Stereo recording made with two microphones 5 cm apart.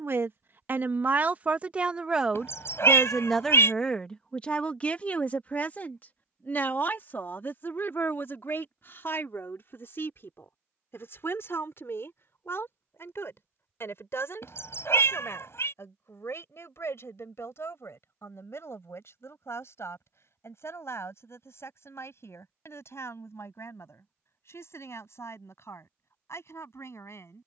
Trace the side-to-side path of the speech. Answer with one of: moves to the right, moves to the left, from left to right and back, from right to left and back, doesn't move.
moves to the left.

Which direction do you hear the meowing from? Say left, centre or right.
left.